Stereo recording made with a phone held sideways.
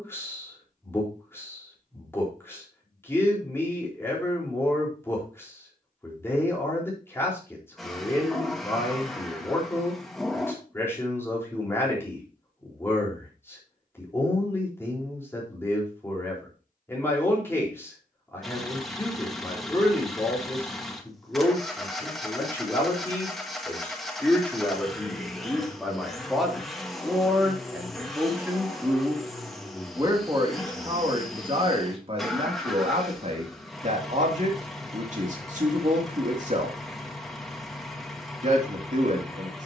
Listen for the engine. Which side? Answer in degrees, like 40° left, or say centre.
centre.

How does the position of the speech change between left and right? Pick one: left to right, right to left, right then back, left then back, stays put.
left to right.